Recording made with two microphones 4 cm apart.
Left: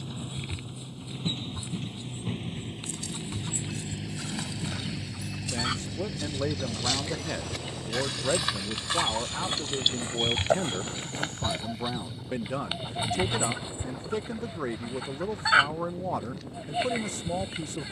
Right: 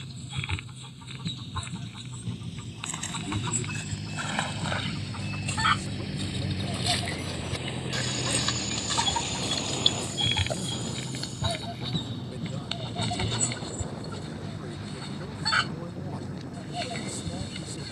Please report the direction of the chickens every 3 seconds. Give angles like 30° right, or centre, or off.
40° right, 40° right, 30° right, 10° right, 10° left, 20° left.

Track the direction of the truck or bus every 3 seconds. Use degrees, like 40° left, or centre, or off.
40° left, 10° left, 20° right, 50° right, 60° right, 70° right.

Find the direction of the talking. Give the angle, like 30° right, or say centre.
60° left.